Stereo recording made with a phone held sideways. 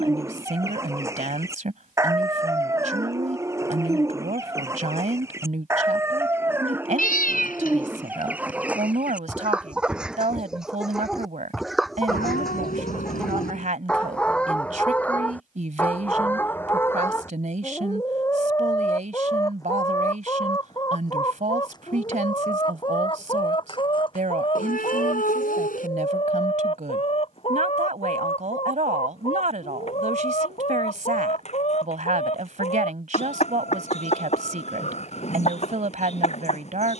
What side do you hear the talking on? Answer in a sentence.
In this clip you hear the talking on the right.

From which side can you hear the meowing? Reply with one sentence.
You can hear the meowing on the left.